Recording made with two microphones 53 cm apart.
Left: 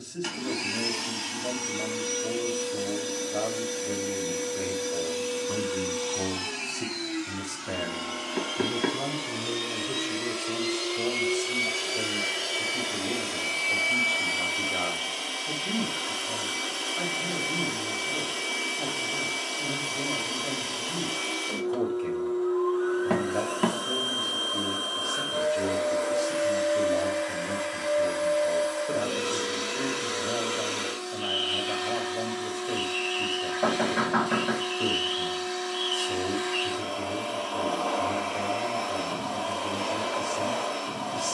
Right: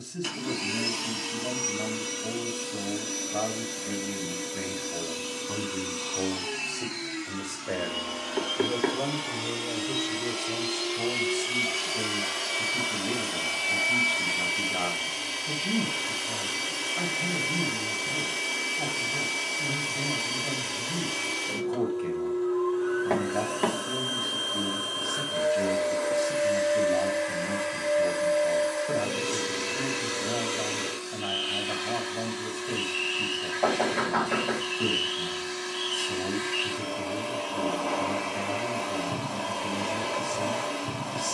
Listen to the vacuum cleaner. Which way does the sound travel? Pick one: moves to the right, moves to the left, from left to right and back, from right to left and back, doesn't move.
moves to the right.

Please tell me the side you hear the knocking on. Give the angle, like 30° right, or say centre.
30° left.